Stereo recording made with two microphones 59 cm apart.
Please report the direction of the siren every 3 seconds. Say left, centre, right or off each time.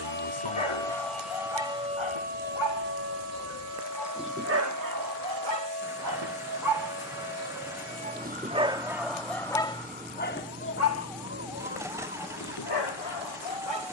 centre, right, right, right, right.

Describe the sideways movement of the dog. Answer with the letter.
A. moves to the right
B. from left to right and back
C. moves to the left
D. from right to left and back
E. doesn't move
B.